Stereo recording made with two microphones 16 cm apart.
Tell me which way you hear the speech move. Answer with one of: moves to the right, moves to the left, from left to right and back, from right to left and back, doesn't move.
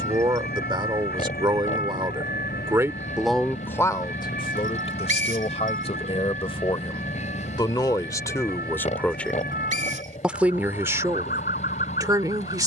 from right to left and back.